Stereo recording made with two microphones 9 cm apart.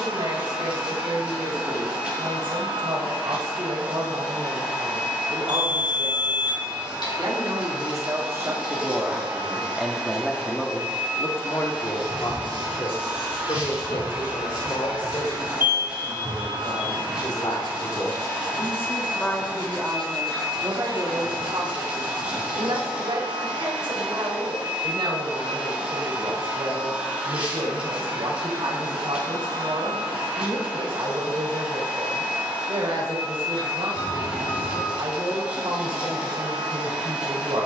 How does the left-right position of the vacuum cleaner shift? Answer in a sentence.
In this clip you hear the vacuum cleaner stay in one place.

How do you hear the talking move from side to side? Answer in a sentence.
You can hear the talking move from right to left and back again.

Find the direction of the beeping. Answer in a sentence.
You can hear the beeping on the left.